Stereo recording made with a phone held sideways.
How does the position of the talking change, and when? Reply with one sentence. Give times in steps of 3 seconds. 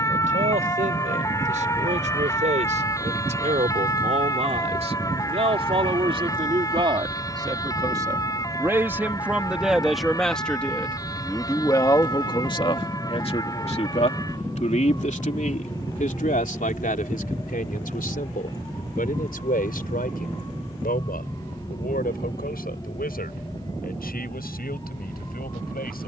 In this clip you hear the talking on the right from 0 s, in the centre from 9 s and on the left from 12 s.